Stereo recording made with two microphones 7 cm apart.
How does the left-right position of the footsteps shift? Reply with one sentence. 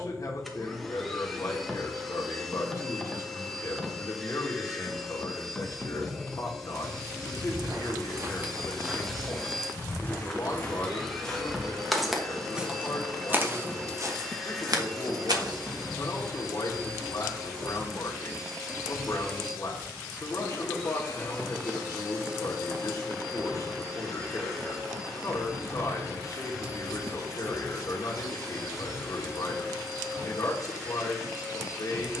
You can hear the footsteps move from right to left and back again.